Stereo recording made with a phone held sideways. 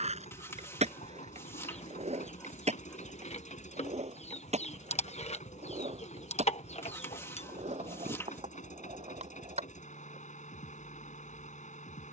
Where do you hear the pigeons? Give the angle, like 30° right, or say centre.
60° left.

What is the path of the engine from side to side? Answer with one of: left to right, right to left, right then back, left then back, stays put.
stays put.